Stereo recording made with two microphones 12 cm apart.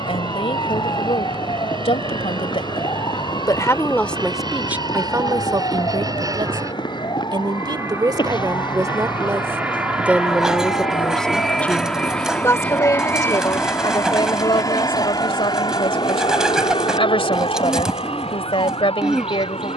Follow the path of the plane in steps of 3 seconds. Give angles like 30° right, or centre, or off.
50° right, 40° right, 30° right, 10° right, 20° left, 40° left, 50° left.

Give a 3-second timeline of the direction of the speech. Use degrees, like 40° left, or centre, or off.
50° left, 10° right, 40° right, centre, 40° left, 50° left, 50° left.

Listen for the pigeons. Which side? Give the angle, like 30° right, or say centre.
centre.